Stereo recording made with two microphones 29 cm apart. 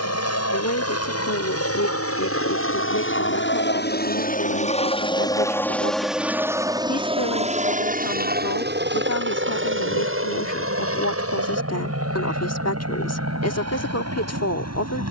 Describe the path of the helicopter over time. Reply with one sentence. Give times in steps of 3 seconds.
In this clip you hear the helicopter on the left from 0 s and on the right from 6 s.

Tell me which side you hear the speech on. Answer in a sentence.
In this clip you hear the speech on the left.